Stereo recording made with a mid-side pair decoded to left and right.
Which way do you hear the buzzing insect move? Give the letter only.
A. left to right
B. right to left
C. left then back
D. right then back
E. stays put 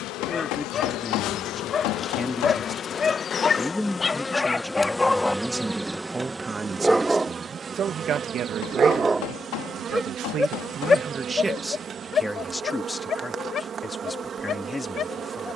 A.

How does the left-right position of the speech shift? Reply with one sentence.
In this clip you hear the speech go right and come back.